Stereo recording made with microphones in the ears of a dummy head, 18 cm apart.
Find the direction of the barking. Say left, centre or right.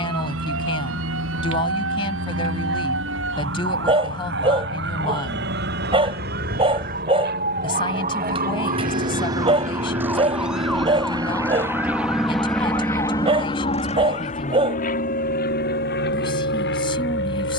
right.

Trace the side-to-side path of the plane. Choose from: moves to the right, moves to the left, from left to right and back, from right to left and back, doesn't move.
moves to the left.